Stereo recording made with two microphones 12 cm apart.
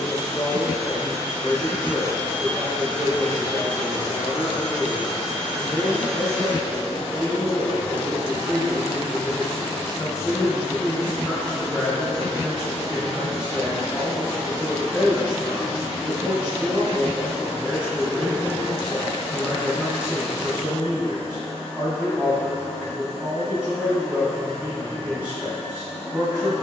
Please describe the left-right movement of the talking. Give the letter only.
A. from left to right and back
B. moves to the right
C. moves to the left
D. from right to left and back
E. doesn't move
B.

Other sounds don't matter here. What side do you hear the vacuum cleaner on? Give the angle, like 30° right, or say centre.
80° left.